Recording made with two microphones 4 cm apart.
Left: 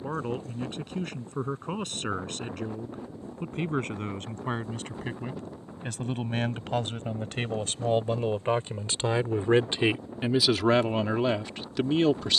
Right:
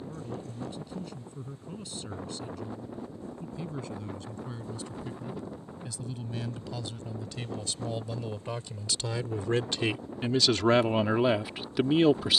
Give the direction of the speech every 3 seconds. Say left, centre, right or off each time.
left, left, left, centre.